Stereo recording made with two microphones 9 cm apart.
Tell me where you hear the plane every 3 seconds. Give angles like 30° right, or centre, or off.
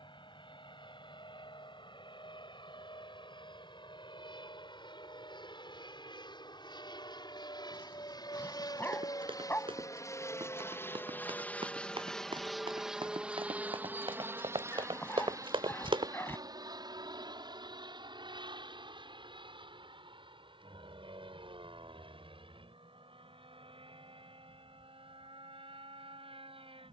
80° left, 70° left, 60° left, 30° left, 10° right, 40° right, 60° right, 60° right, 70° right.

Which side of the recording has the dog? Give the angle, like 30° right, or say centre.
20° left.